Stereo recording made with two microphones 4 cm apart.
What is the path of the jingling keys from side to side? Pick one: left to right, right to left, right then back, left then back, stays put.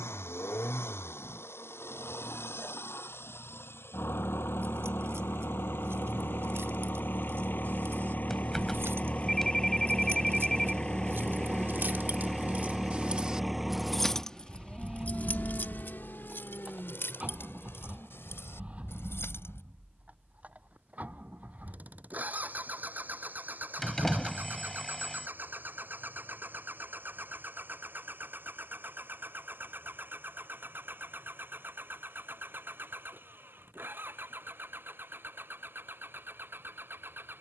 right to left.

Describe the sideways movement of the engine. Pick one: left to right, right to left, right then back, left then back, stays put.
left to right.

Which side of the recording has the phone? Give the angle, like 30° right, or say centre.
10° left.